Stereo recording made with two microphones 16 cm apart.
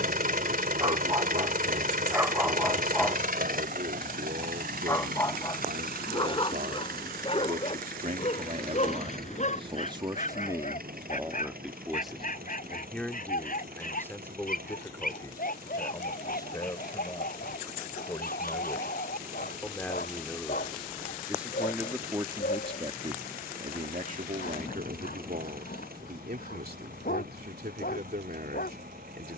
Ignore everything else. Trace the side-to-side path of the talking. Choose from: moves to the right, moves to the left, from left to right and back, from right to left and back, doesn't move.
from right to left and back.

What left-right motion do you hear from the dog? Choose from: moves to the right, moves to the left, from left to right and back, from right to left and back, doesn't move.
moves to the left.